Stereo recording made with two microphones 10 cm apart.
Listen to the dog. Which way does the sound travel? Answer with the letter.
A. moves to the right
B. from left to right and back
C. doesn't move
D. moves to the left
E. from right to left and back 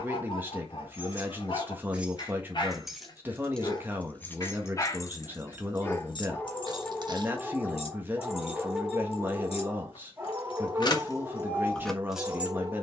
A.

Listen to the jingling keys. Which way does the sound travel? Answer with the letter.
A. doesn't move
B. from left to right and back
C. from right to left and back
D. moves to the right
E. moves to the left
C.